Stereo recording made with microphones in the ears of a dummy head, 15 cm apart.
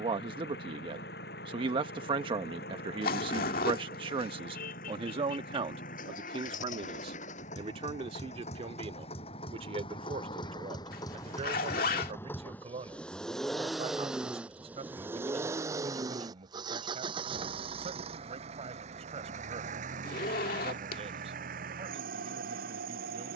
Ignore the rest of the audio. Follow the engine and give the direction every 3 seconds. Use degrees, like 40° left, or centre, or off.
60° left, 50° left, 40° left, 30° left, centre, 20° right, 40° right, 50° right.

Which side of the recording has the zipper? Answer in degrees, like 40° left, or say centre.
60° left.